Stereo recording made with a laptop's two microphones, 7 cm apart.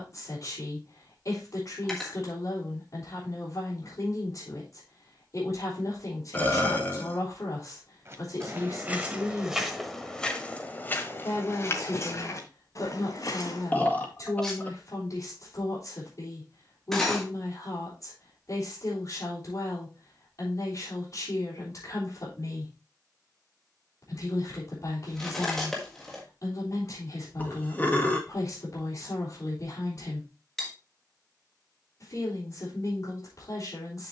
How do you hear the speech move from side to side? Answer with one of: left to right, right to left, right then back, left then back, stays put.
stays put.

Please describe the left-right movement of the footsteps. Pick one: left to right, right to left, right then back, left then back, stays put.
right to left.